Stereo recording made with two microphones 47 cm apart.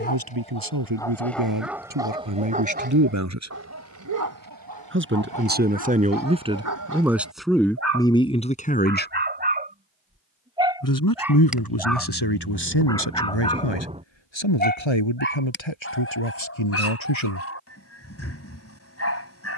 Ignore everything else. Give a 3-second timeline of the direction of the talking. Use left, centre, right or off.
right, right, centre, left, left, left, off.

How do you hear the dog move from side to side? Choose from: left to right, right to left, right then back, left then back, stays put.
right then back.